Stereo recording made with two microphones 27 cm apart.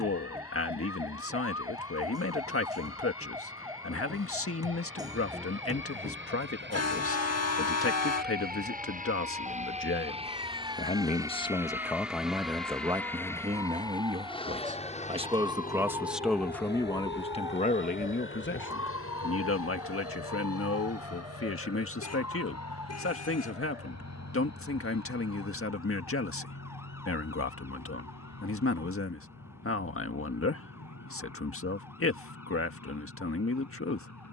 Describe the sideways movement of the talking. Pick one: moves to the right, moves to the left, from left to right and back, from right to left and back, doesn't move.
from left to right and back.